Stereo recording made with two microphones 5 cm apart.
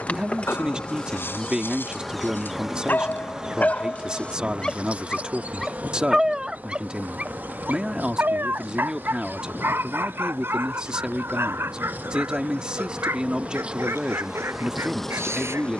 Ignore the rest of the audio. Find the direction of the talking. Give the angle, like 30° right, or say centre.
20° right.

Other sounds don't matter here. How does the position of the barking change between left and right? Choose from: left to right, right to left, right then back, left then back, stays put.
left to right.